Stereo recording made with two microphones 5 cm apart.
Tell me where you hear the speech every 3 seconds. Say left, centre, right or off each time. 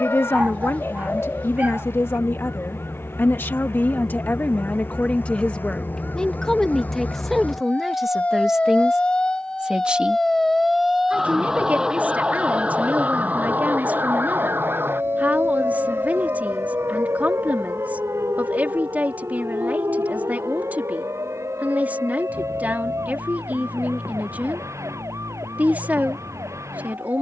left, left, centre, right, right, right, right, right, right.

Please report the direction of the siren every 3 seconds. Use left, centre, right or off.
left, left, left, centre, right, right, right, right, right.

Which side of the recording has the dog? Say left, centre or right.
right.